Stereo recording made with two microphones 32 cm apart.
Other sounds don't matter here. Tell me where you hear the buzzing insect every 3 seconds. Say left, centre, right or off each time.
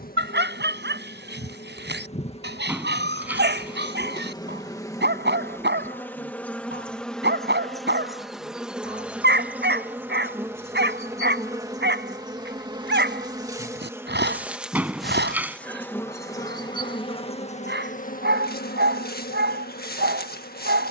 left, centre, centre, centre, centre, centre, left.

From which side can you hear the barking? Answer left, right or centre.
right.